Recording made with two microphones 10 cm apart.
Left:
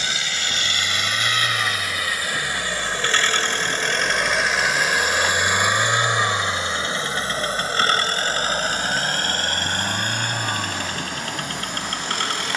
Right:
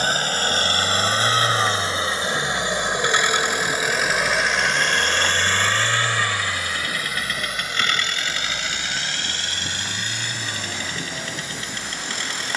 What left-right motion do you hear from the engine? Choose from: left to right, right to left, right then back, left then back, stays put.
right to left.